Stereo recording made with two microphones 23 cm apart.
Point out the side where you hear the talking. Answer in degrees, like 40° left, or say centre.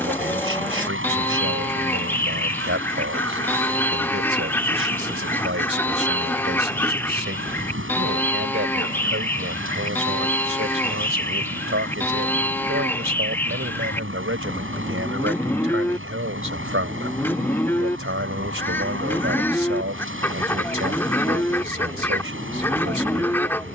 70° right.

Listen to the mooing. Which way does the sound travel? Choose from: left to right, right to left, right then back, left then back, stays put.
stays put.